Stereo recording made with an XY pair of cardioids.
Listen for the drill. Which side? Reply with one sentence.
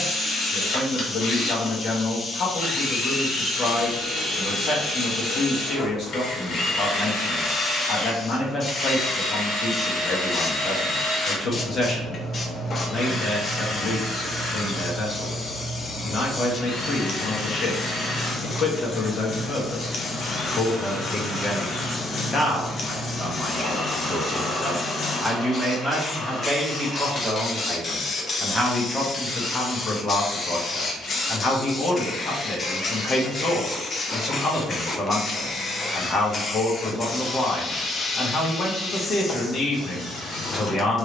In this clip you hear the drill on the left.